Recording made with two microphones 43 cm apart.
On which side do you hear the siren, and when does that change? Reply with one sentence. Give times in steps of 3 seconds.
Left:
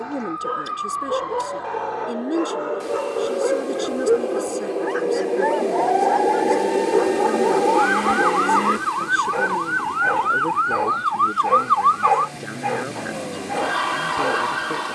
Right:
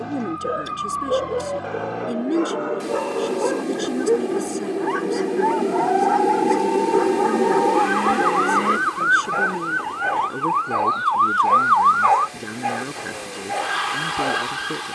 You can hear the siren on the right from 0 s, in the centre from 6 s and on the left from 9 s.